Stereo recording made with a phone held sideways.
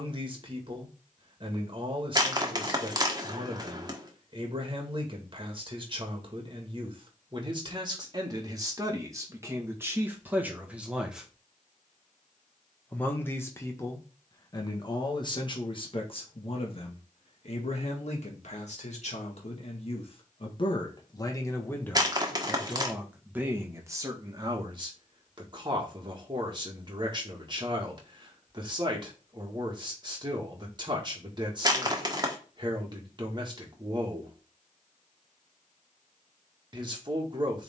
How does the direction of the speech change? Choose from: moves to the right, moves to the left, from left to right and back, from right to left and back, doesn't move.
from right to left and back.